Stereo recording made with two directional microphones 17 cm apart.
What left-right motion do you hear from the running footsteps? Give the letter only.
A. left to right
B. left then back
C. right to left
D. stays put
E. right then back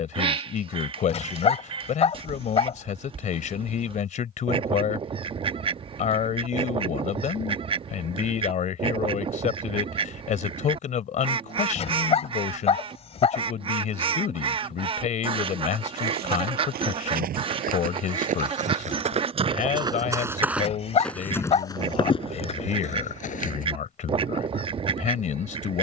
C.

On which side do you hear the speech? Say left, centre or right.
left.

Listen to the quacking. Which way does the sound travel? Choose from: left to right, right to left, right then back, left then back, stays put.
stays put.